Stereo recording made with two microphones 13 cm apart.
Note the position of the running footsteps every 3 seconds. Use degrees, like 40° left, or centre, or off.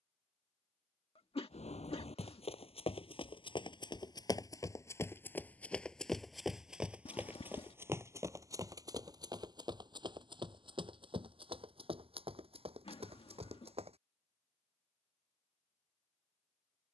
50° left, 30° left, 20° right, 40° right, 50° right, off.